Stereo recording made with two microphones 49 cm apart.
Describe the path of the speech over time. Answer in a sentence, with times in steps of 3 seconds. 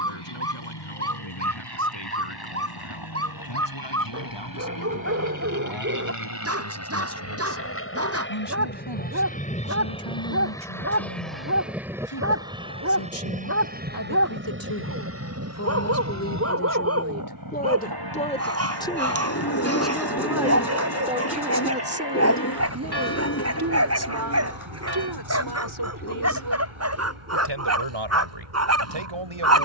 In this clip you hear the speech on the left from 0 s, in the centre from 18 s and on the right from 21 s.